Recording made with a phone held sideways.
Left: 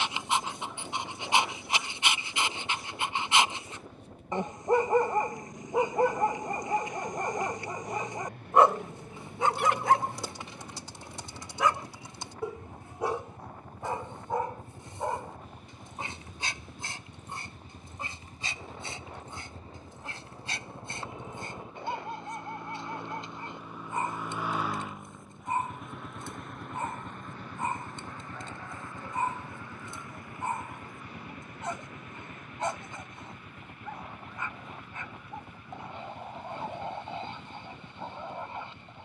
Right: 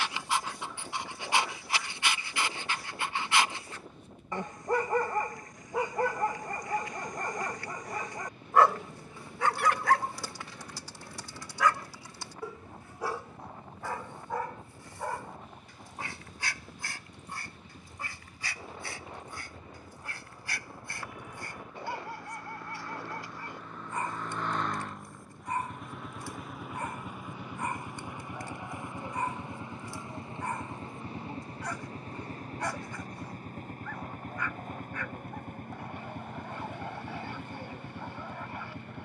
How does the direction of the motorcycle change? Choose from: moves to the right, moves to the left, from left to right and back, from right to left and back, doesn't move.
moves to the right.